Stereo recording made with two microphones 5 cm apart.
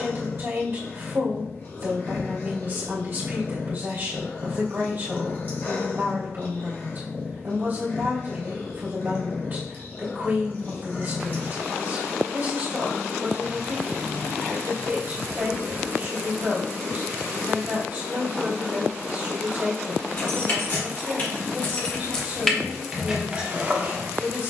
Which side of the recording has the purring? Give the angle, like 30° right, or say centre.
40° left.